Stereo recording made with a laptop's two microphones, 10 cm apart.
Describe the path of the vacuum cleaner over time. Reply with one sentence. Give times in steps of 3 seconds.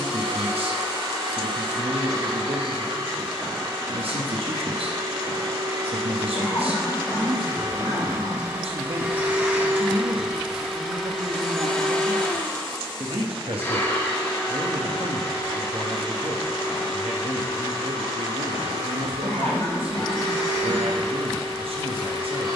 You can hear the vacuum cleaner on the right from 0 s, in the centre from 9 s and on the left from 12 s.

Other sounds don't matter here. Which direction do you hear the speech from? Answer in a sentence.
You can hear the speech on the right.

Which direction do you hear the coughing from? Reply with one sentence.
You can hear the coughing on the left.